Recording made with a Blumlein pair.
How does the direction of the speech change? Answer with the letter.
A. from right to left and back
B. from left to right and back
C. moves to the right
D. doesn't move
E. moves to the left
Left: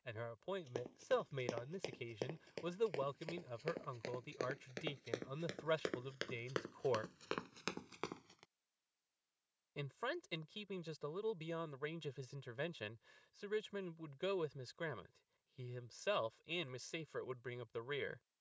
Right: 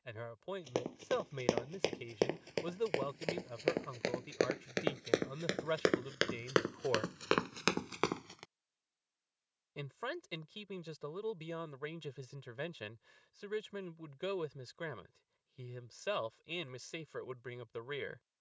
D.